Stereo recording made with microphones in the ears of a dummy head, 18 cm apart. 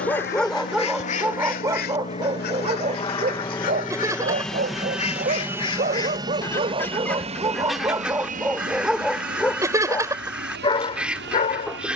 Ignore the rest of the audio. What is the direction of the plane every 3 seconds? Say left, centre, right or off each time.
left, centre, right, right.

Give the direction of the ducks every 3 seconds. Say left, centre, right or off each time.
left, left, centre, centre.